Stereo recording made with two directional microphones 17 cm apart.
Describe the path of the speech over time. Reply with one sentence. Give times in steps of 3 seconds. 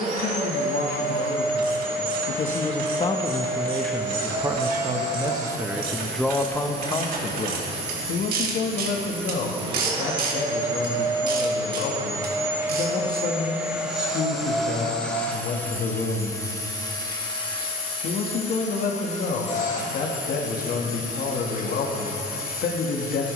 In this clip you hear the speech on the left from 0 s, in the centre from 3 s and on the left from 6 s.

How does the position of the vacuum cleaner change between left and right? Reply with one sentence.
In this clip you hear the vacuum cleaner go from the right side to the left.